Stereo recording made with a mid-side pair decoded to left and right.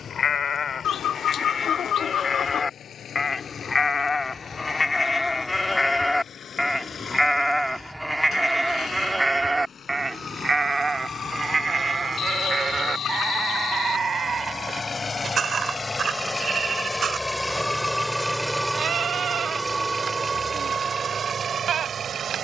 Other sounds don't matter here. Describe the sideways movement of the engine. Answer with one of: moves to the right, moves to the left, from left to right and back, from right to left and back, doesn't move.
moves to the right.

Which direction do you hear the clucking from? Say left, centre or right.
left.